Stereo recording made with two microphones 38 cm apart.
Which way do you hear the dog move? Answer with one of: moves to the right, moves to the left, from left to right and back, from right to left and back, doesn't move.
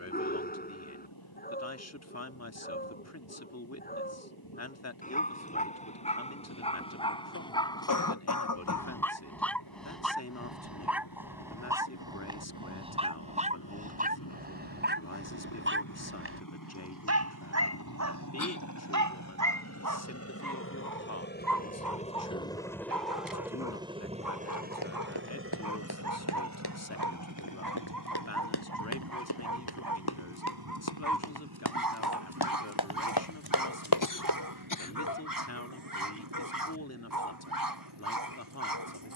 moves to the right.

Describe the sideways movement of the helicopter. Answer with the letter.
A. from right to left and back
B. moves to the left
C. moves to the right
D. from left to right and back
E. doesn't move
C.